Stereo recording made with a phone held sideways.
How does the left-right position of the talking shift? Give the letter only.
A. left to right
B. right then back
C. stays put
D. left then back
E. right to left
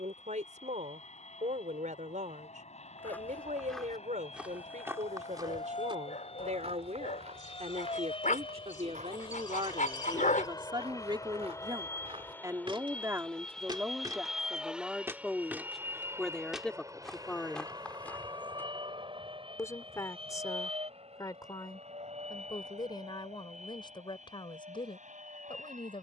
E.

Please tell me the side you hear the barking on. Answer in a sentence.
In this clip you hear the barking on the left.